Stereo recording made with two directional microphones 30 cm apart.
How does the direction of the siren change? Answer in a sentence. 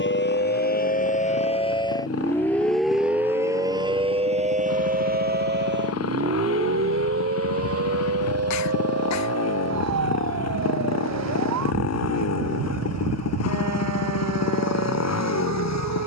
In this clip you hear the siren move to the right.